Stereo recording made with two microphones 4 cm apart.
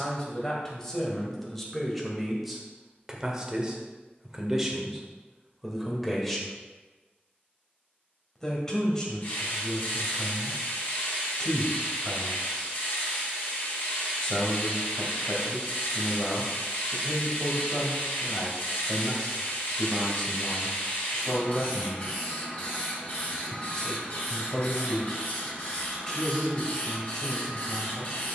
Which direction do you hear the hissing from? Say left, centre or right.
left.